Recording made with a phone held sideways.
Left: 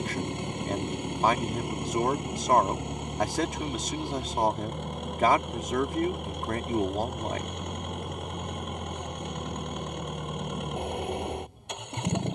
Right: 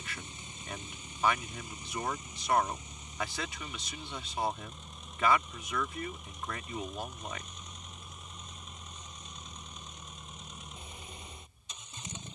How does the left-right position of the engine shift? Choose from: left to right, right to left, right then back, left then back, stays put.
stays put.